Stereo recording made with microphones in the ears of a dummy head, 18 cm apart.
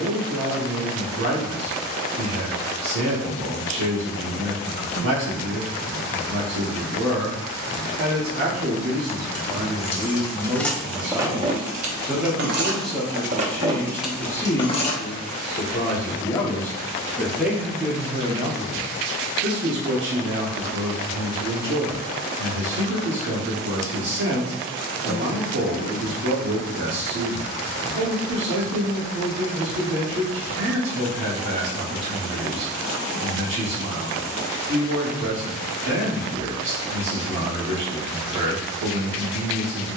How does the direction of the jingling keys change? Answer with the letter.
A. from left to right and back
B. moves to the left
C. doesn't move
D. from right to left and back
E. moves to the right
A.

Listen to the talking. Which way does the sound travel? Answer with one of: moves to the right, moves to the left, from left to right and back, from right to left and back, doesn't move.
from right to left and back.